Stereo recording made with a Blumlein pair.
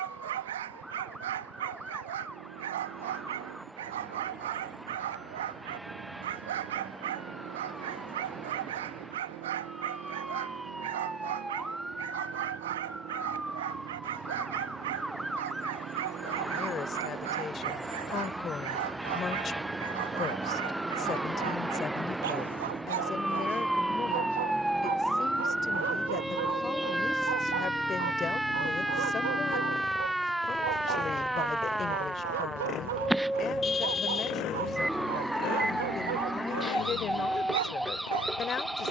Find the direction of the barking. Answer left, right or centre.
right.